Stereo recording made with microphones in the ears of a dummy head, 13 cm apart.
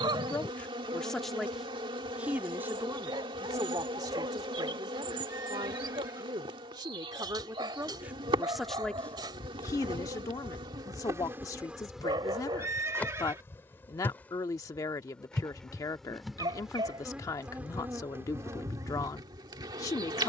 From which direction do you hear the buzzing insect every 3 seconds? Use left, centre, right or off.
right, right, right, right, centre, centre, right.